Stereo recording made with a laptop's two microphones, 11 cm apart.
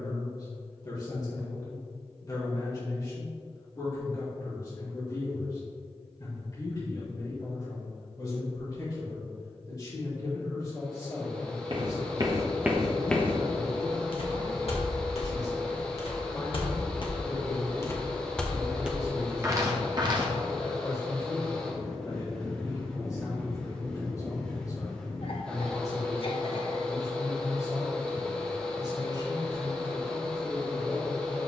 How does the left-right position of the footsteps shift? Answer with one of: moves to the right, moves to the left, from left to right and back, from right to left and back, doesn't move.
from right to left and back.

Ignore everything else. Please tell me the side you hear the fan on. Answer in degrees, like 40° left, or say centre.
10° left.